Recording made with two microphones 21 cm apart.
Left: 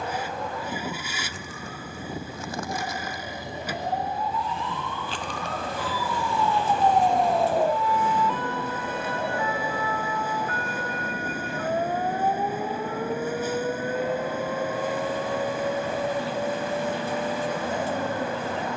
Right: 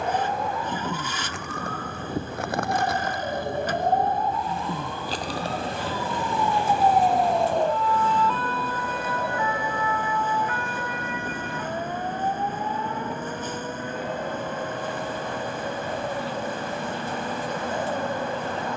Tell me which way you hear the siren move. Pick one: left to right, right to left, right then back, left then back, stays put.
right to left.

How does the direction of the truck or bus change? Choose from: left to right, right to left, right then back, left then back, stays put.
stays put.